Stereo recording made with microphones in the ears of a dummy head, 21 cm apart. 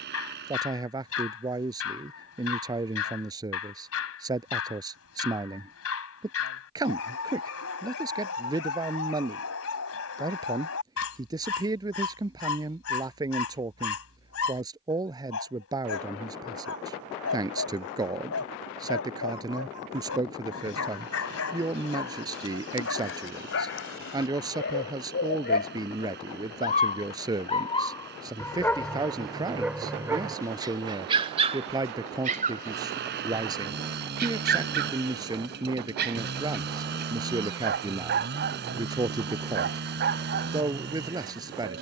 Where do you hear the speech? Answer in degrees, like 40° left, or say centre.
20° right.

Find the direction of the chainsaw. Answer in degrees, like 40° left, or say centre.
50° right.